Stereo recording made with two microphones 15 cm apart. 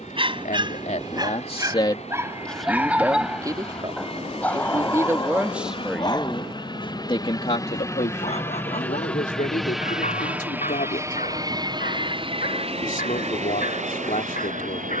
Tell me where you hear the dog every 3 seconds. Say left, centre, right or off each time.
right, centre, left, left, left.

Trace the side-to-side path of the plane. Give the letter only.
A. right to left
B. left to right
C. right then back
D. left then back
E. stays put
B.